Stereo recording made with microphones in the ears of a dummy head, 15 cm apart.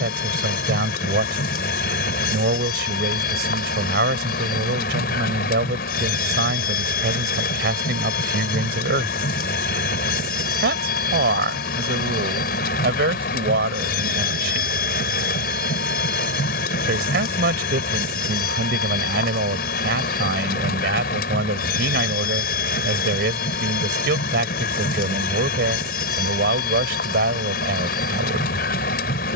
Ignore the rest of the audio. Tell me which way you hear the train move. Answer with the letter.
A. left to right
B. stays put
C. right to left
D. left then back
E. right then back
B.